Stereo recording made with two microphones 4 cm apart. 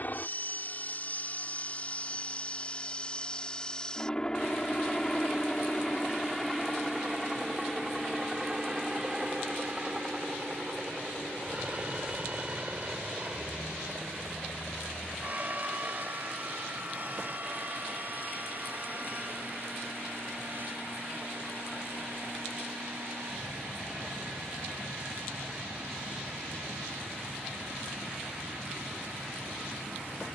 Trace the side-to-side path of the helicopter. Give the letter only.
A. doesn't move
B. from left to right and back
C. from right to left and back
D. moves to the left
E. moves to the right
E.